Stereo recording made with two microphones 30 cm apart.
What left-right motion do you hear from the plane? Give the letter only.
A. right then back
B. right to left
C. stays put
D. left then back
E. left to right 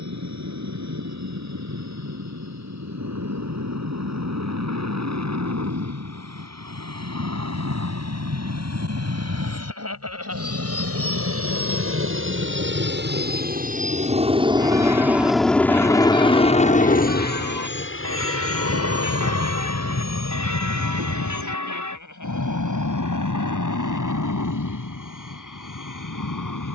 B.